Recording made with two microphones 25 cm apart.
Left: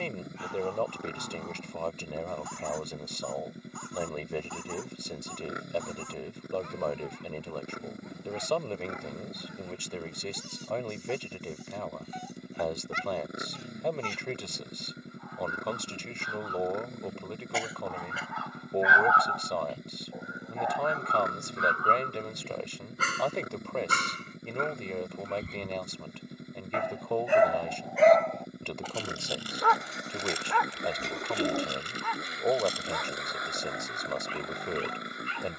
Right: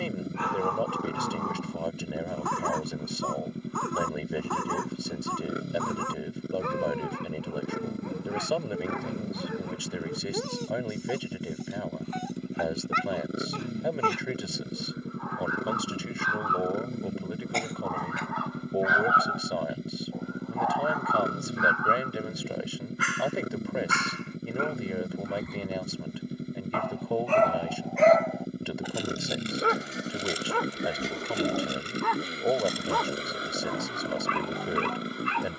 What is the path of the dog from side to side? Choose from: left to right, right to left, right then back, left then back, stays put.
left then back.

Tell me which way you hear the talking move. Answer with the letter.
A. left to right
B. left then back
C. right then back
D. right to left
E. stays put
E.